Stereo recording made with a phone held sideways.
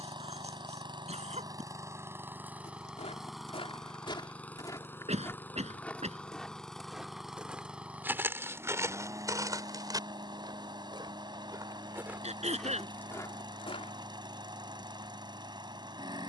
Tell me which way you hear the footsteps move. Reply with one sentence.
You can hear the footsteps move from left to right and back again.